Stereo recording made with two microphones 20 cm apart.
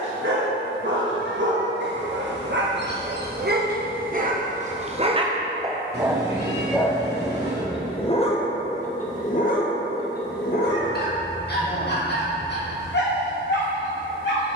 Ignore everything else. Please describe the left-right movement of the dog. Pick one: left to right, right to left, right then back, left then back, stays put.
right to left.